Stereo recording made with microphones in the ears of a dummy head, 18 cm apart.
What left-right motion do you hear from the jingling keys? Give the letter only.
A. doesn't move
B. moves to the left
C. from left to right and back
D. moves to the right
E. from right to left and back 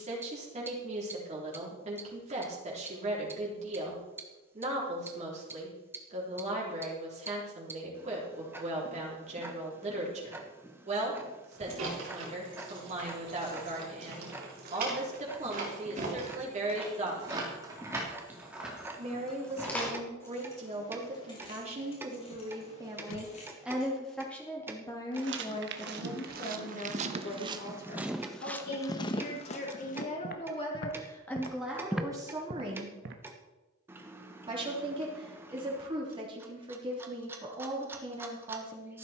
B.